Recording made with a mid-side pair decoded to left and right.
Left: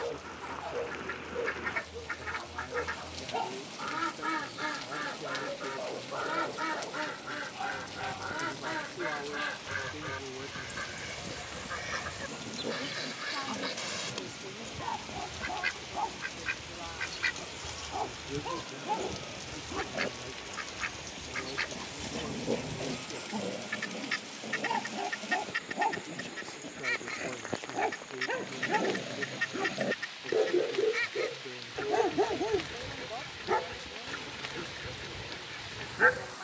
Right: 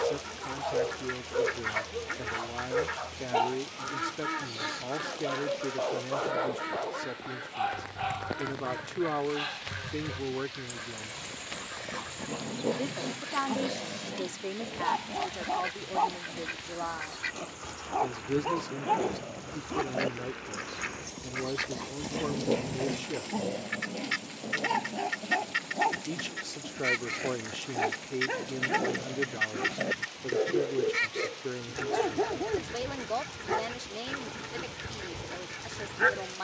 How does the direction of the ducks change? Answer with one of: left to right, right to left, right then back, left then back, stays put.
left then back.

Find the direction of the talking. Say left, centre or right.
right.